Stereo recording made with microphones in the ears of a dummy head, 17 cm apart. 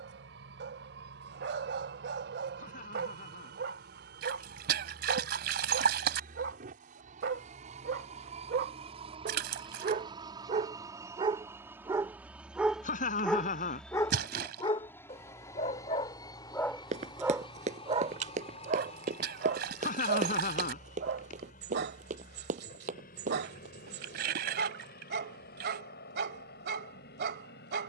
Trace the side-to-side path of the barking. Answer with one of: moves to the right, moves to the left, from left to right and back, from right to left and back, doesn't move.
from right to left and back.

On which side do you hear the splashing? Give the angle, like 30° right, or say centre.
60° right.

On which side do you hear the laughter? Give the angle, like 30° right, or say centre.
40° left.